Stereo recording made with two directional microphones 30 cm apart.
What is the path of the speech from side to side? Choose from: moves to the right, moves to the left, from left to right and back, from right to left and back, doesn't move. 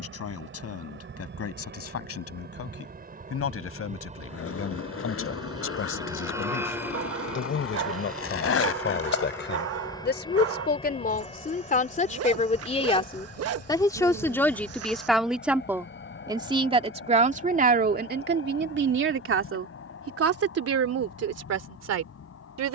moves to the right.